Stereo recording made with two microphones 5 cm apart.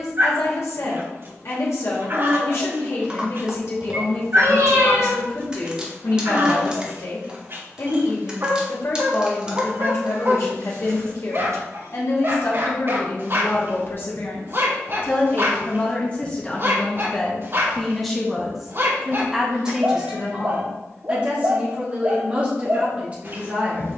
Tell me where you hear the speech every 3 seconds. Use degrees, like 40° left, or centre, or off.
60° left, 60° left, 60° left, 60° left, 50° left, 20° left, 10° right, 20° right.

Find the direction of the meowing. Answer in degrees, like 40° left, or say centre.
70° right.